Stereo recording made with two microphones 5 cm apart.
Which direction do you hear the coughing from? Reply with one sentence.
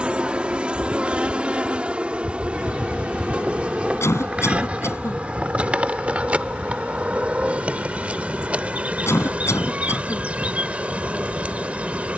In this clip you hear the coughing on the left.